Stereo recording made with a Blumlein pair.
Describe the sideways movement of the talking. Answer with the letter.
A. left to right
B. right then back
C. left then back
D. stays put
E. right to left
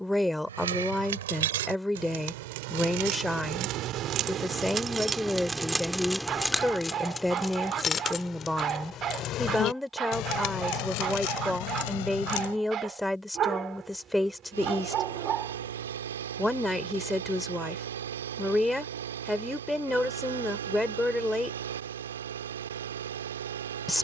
D.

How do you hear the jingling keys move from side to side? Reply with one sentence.
You can hear the jingling keys move to the left.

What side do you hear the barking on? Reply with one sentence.
In this clip you hear the barking on the right.